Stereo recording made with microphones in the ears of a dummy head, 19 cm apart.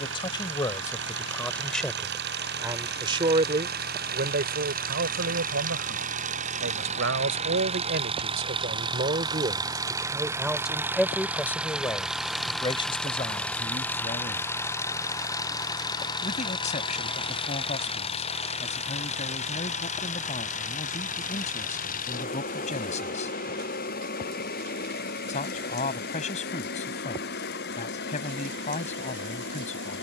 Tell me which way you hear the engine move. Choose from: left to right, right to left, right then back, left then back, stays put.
right to left.